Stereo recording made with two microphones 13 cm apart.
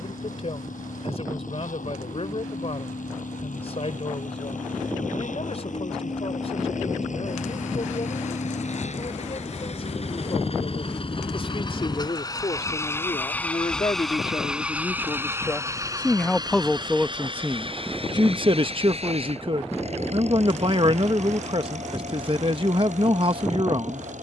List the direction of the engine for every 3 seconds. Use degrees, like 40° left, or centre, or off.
80° left, 70° left, 70° left, 50° left, 10° left, 30° right, 50° right, 60° right.